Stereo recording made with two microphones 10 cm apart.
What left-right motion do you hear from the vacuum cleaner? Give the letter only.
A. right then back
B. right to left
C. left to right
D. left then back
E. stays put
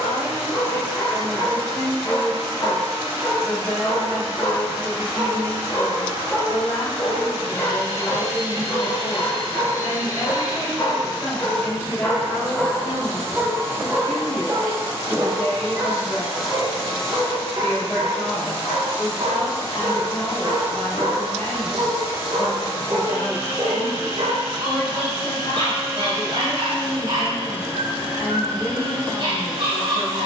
B.